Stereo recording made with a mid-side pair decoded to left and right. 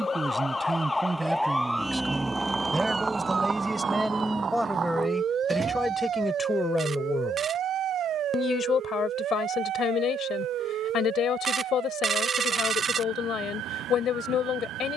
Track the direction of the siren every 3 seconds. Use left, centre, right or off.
centre, right, right, right, right.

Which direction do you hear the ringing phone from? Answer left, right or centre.
right.